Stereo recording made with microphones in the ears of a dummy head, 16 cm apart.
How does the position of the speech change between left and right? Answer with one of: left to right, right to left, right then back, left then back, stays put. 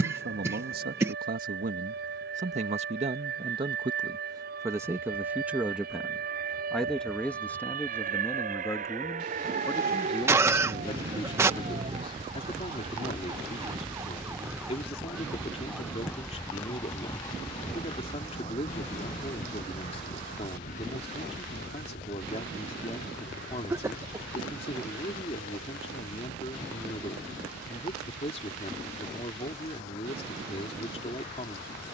right to left.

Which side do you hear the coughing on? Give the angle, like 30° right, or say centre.
20° right.